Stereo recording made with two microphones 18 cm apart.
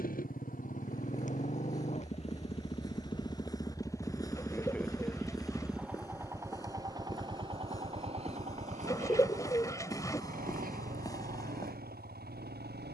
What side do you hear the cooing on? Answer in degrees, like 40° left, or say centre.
20° left.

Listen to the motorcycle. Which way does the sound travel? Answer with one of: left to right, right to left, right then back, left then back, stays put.
left to right.